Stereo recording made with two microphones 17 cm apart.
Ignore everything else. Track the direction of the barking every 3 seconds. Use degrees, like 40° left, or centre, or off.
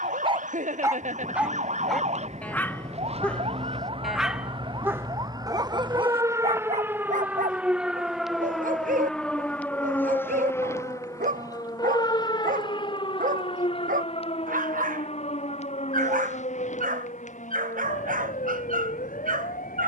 10° right, 10° right, 50° right, 50° right, 50° right, 50° right, 50° right.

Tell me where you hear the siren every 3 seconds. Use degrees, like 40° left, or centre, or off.
50° right, 30° right, 10° right, 10° left, 30° left, 40° left, 50° left.